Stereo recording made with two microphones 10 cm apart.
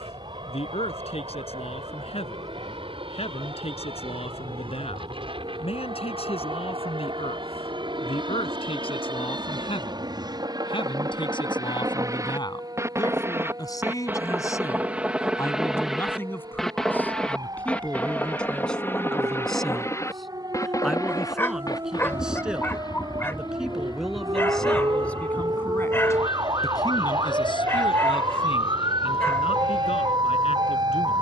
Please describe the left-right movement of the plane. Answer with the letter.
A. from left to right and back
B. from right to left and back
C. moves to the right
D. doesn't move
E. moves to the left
E.